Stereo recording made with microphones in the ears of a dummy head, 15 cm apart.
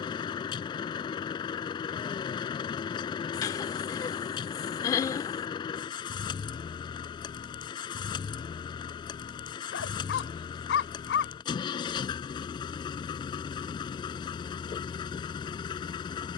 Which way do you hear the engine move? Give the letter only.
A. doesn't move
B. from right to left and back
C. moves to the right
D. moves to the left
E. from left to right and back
A.